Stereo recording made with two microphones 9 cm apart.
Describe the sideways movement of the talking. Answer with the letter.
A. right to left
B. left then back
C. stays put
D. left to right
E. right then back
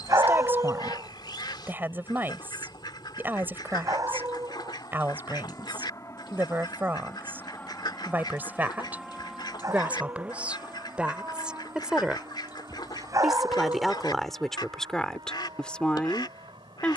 A.